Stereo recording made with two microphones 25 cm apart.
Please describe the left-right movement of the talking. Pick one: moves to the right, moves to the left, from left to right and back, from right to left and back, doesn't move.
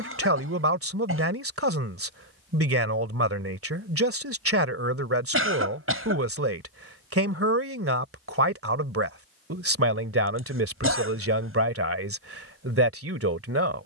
doesn't move.